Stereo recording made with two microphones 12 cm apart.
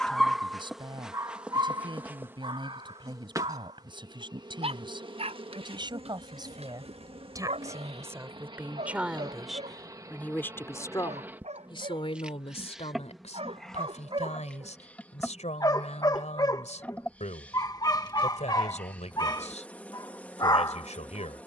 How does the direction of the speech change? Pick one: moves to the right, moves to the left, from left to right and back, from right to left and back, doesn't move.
moves to the left.